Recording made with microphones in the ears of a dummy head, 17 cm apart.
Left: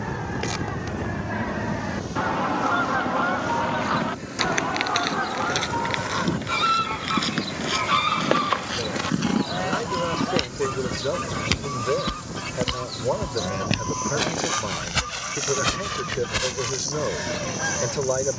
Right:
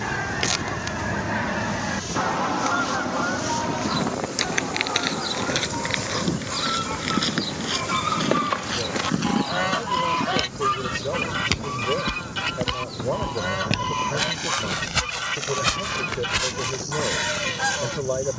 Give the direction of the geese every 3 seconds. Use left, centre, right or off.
right, left, left, right, right, right.